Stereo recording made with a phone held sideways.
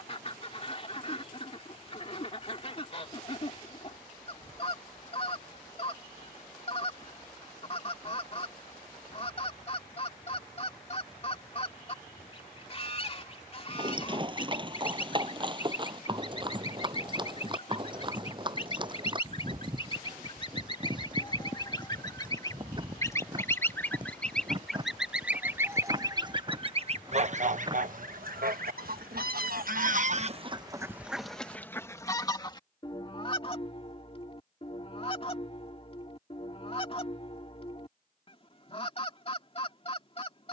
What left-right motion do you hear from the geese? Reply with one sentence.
In this clip you hear the geese move from left to right and back again.